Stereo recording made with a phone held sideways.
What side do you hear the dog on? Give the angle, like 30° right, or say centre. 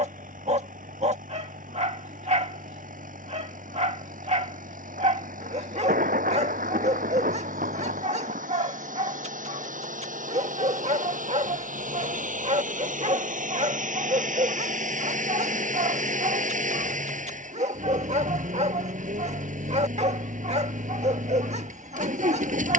40° right.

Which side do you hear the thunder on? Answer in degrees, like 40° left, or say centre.
60° right.